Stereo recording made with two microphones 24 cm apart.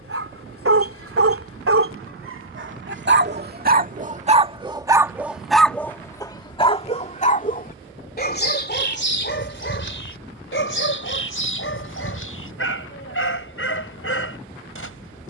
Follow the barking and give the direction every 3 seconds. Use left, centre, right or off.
right, right, left, left, left.